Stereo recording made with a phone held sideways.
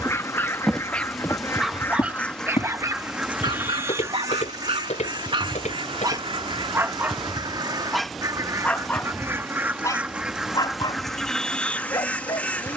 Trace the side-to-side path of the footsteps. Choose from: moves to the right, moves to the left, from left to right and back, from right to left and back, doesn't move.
moves to the left.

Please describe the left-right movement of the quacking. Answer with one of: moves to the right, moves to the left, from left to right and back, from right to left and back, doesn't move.
from left to right and back.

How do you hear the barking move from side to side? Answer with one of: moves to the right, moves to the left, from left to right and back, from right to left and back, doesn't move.
from left to right and back.